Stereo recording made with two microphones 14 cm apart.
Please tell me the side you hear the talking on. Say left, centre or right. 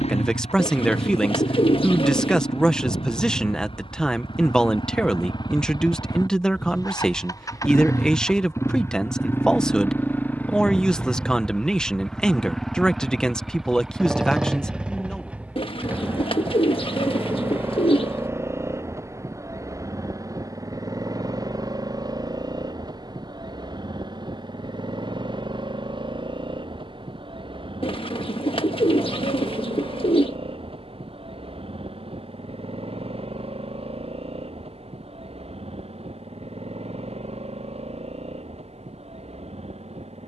centre.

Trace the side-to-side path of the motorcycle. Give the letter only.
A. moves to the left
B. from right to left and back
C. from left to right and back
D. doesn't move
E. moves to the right
E.